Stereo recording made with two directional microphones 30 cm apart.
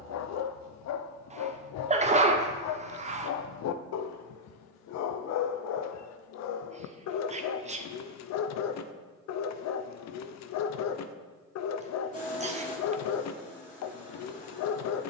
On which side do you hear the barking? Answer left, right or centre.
left.